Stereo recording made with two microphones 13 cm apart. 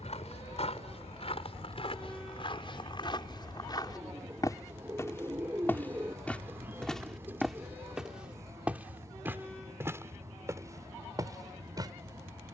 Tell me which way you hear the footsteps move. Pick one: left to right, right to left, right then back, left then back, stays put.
left to right.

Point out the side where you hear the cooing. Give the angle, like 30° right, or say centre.
20° right.